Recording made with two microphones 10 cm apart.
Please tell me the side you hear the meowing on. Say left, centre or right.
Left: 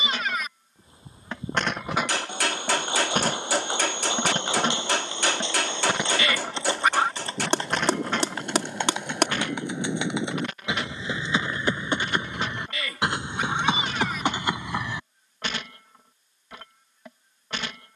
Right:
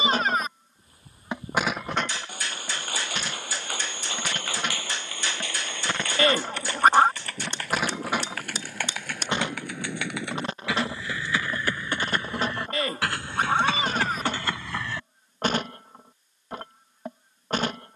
right.